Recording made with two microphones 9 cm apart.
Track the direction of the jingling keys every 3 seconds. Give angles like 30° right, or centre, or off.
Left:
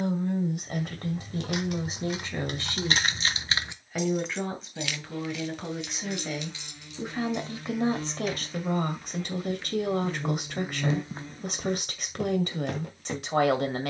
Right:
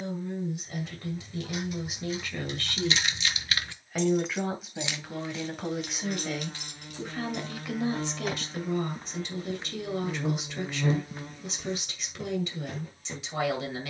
70° left, 10° right, 50° right, off, off.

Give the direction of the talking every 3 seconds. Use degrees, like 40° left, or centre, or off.
40° left, centre, 30° left, 50° left, 50° left.